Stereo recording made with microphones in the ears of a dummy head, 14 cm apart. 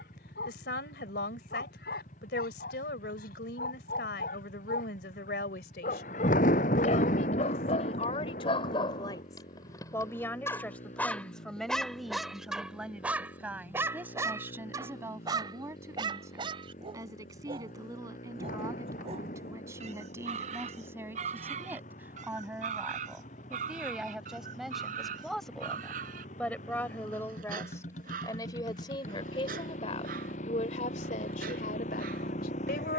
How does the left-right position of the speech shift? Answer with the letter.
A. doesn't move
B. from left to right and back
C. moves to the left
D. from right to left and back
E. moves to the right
B.